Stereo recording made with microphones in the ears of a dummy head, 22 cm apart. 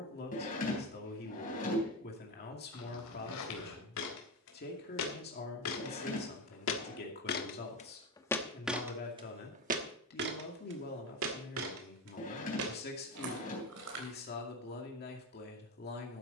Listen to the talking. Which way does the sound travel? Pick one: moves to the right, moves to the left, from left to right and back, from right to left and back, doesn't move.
doesn't move.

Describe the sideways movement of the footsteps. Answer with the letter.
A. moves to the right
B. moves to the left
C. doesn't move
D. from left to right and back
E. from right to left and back
A.